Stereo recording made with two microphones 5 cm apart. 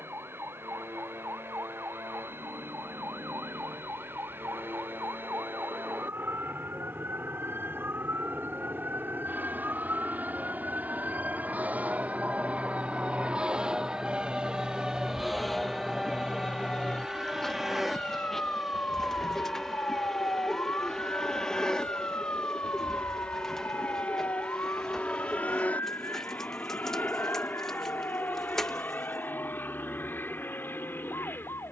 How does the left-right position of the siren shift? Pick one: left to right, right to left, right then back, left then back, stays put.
right to left.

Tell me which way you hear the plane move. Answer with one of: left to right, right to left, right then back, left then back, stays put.
right to left.